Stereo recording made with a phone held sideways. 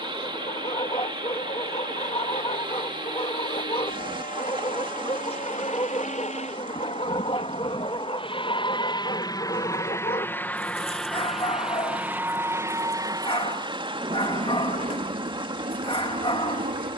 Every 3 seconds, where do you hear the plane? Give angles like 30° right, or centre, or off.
70° left, 60° left, 40° left, 10° left, 30° right, 50° right.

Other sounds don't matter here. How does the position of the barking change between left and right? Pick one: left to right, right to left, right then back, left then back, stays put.
stays put.